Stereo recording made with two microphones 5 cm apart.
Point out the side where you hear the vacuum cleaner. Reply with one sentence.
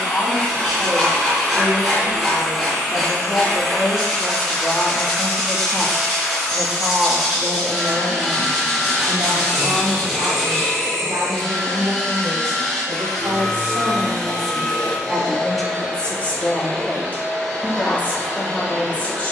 You can hear the vacuum cleaner in the centre.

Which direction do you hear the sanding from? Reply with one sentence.
You can hear the sanding in the centre.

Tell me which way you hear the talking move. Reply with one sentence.
You can hear the talking go right and come back.